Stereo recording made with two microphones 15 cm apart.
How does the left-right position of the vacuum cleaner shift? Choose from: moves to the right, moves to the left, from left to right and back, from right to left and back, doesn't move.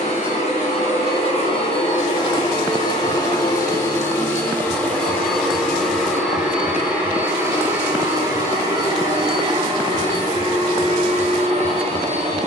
moves to the right.